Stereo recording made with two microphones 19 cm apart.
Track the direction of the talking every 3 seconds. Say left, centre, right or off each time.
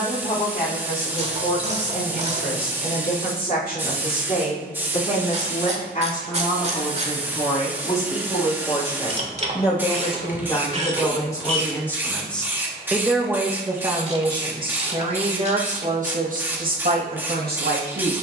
left, left, left, left, centre, right.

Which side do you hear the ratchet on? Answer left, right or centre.
right.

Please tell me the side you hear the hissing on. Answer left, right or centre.
centre.